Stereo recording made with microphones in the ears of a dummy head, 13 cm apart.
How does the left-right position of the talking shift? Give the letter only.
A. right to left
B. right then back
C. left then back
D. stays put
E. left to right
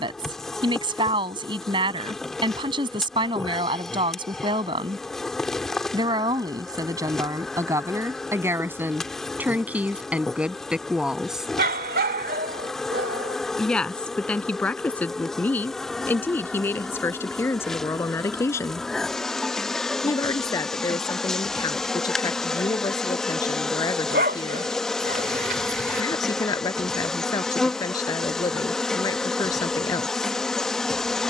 A.